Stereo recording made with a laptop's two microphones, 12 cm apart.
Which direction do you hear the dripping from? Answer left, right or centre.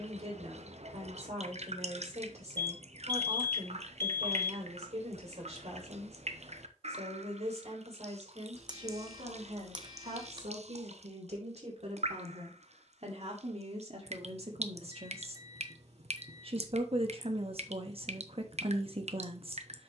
right.